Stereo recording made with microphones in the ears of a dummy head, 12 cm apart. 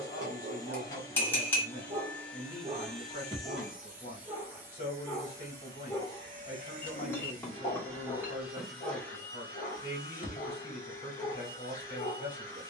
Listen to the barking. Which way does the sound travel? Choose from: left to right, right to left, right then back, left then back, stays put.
right to left.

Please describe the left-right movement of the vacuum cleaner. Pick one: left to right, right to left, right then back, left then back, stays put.
right then back.